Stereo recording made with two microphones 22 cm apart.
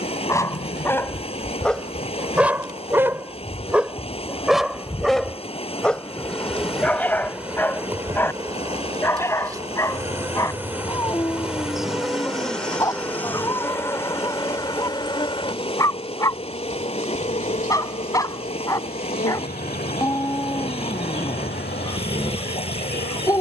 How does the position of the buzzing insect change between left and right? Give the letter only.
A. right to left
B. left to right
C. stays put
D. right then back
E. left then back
D.